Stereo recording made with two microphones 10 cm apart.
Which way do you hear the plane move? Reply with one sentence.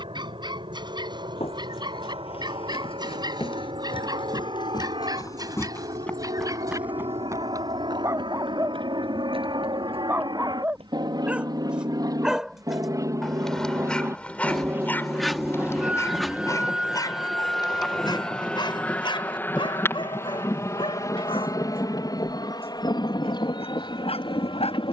In this clip you hear the plane go from the right side to the left.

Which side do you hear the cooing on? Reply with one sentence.
In this clip you hear the cooing in the centre.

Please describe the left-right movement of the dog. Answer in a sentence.
In this clip you hear the dog move from right to left.